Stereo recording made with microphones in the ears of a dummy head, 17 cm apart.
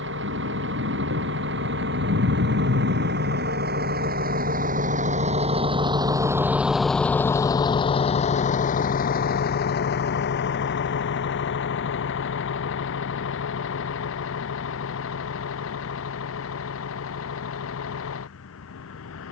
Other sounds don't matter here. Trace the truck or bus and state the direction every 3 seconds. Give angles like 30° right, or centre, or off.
70° right, 50° right, 20° left, 60° left, 70° left, 80° left, 80° left.